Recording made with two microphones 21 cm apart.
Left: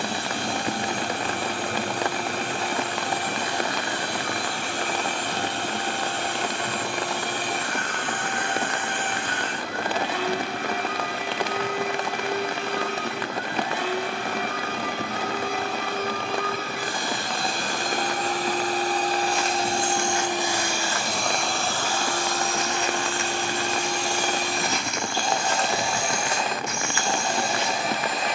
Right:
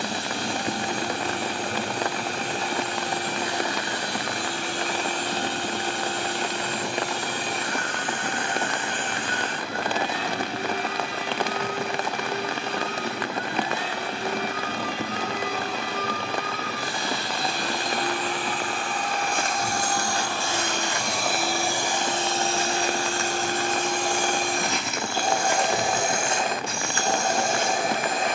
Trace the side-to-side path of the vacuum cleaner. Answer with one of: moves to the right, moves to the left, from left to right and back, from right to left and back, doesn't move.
moves to the right.